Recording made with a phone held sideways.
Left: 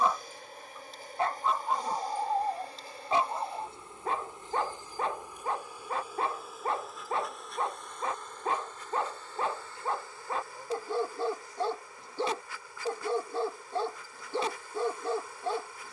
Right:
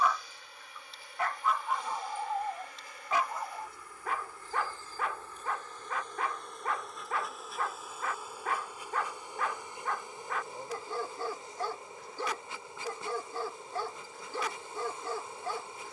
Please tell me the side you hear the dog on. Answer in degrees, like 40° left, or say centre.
30° left.